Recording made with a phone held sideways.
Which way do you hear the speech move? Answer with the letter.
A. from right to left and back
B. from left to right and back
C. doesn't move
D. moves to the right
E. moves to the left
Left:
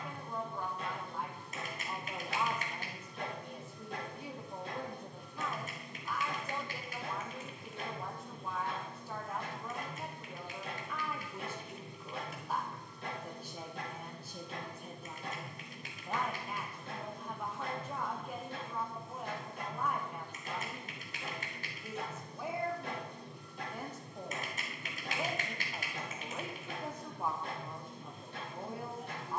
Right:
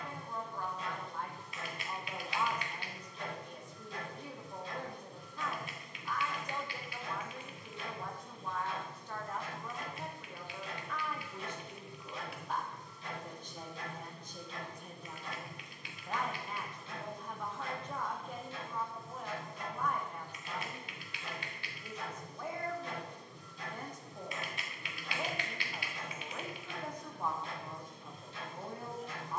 C.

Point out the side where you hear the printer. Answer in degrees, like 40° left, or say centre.
60° left.